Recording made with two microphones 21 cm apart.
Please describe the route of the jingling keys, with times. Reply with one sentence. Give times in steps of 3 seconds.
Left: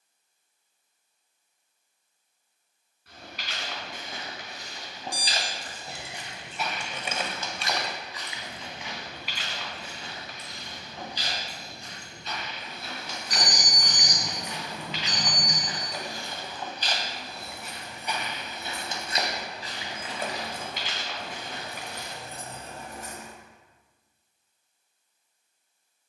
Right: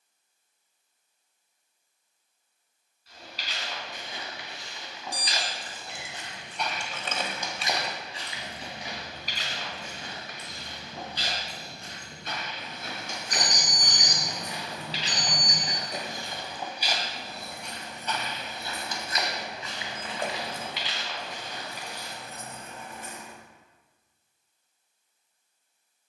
In this clip you hear the jingling keys not at all from 0 s, on the left from 3 s, in the centre from 6 s, on the right from 9 s, on the left from 21 s and not at all from 24 s.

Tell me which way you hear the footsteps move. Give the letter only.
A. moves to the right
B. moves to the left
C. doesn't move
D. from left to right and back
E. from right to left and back
D.